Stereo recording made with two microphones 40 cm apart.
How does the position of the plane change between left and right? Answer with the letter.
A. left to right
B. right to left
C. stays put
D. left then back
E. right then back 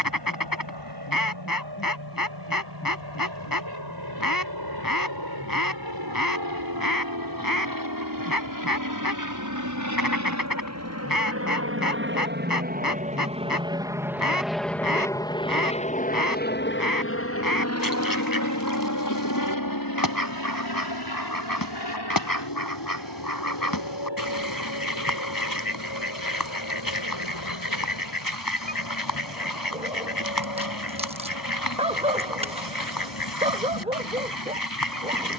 B.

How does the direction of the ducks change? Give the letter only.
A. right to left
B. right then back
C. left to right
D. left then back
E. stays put
E.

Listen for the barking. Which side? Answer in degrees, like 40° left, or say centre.
10° right.